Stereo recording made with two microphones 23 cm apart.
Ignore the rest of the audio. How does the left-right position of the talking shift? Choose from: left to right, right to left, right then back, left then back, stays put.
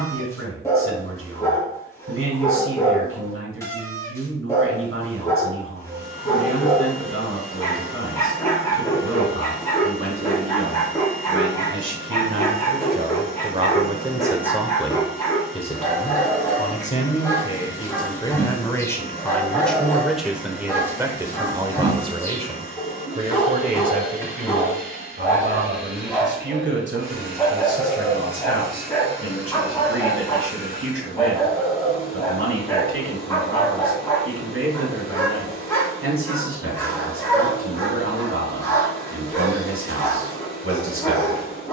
left then back.